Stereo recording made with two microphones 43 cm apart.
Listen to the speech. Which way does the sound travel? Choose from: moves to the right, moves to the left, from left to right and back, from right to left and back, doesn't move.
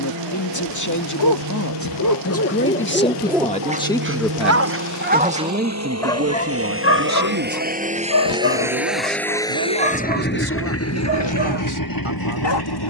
moves to the right.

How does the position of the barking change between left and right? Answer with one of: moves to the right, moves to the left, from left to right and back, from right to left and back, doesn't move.
from left to right and back.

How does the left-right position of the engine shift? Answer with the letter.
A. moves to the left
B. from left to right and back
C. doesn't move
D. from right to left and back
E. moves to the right
A.